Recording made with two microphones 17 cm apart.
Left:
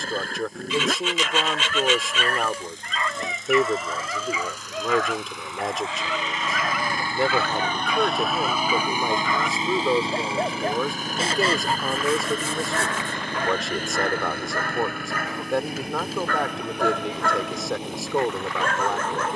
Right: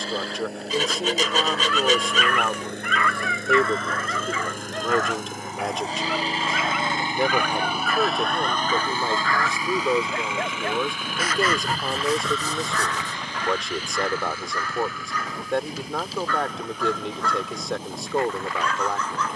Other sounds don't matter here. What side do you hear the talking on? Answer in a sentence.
You can hear the talking in the centre.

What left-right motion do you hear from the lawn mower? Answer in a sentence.
In this clip you hear the lawn mower move to the left.